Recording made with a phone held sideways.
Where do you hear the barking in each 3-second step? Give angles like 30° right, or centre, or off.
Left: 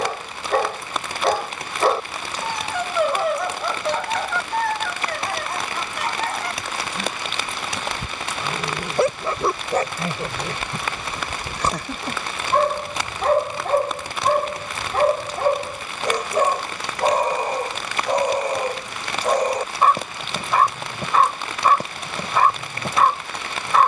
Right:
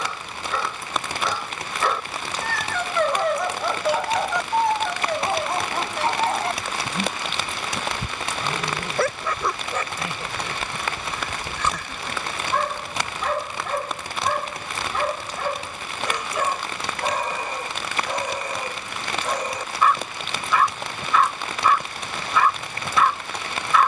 40° left, 10° right, 10° right, 40° left, 40° left, 40° left, 40° left, 40° left.